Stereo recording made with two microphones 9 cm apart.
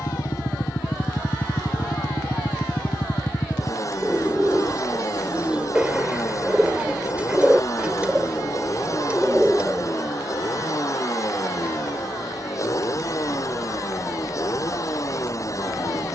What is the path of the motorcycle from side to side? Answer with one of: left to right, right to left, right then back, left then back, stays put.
stays put.